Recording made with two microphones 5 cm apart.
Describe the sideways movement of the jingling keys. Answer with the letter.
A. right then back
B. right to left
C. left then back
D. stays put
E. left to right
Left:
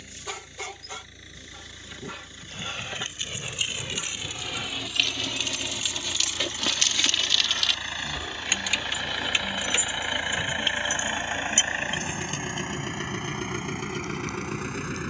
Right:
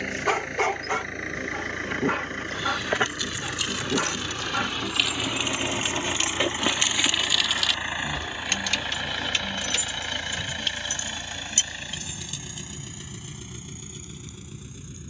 A.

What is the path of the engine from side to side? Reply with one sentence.
You can hear the engine move from right to left.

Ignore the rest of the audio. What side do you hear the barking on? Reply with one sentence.
In this clip you hear the barking on the right.